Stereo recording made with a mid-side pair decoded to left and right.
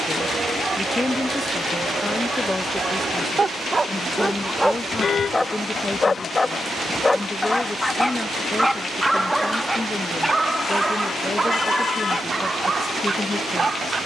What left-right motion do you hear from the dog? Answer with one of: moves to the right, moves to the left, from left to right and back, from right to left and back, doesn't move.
from right to left and back.